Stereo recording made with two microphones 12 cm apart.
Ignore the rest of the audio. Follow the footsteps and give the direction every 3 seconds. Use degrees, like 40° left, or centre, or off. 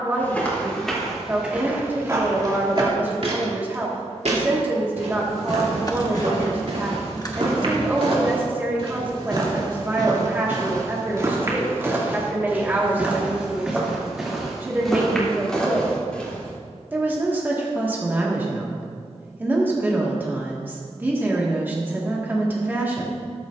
10° right, 70° right, 60° right, 30° right, 10° right, 10° left, off, off.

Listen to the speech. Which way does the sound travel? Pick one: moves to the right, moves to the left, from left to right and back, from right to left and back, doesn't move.
doesn't move.